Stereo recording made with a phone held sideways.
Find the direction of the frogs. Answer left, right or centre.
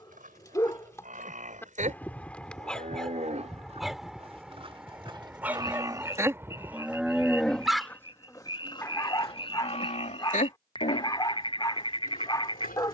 left.